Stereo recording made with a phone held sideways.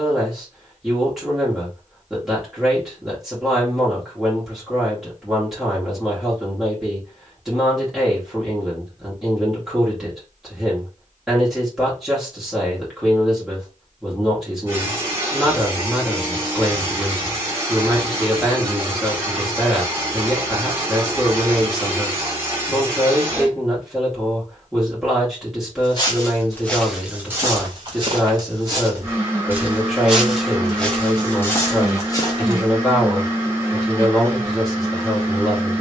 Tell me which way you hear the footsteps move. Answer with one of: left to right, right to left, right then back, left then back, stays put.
right then back.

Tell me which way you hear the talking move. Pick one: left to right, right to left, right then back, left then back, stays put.
stays put.